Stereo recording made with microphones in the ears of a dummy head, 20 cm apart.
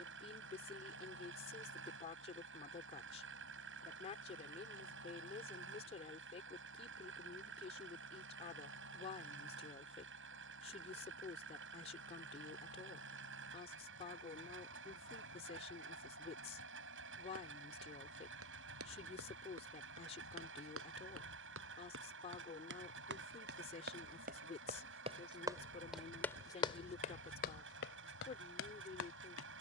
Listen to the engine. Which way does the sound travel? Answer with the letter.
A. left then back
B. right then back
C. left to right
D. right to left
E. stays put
E.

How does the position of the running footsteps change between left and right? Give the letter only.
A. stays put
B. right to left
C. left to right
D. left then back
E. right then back
B.